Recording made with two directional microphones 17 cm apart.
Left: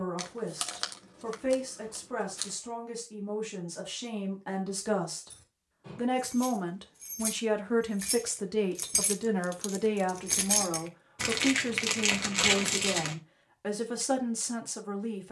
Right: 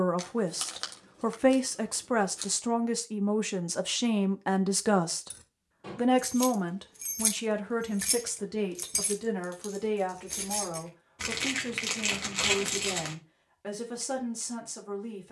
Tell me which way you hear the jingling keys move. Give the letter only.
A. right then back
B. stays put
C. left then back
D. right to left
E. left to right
D.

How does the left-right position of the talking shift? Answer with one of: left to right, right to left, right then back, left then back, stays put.
right to left.